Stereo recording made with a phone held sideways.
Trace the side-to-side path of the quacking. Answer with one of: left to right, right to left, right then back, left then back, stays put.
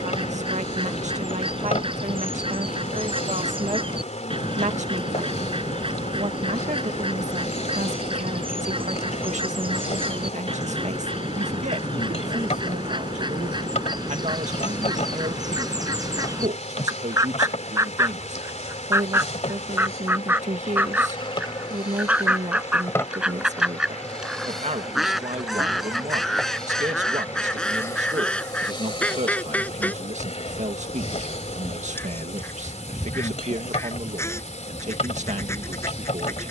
right to left.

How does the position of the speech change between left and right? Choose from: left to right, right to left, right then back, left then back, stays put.
stays put.